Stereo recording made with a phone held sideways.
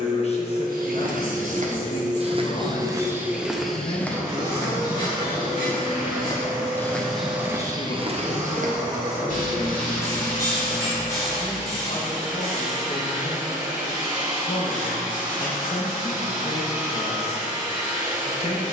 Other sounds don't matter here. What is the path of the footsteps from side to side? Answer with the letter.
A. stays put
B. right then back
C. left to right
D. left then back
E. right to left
D.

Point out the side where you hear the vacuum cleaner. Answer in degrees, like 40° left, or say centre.
30° right.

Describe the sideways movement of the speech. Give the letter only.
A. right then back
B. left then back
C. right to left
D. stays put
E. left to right
D.